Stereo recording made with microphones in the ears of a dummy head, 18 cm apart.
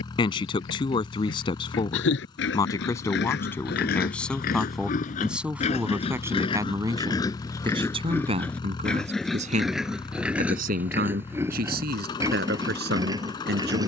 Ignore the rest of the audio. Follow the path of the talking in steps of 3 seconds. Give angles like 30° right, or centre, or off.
20° left, centre, 20° right, 40° right, 50° right.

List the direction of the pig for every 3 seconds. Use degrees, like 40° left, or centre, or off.
70° left, 50° left, 20° left, 10° right, 20° right.